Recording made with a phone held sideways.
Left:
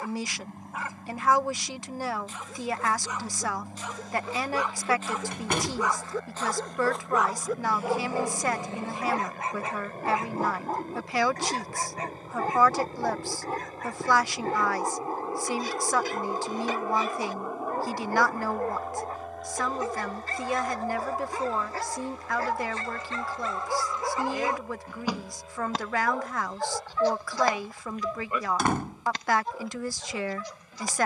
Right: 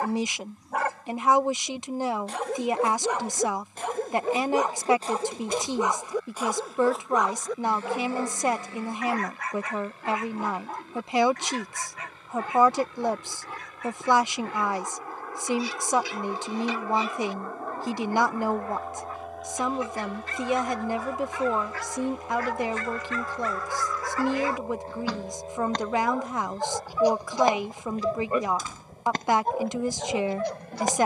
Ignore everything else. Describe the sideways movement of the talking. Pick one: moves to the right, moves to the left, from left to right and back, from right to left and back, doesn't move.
doesn't move.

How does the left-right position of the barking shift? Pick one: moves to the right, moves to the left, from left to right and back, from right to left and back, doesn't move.
from right to left and back.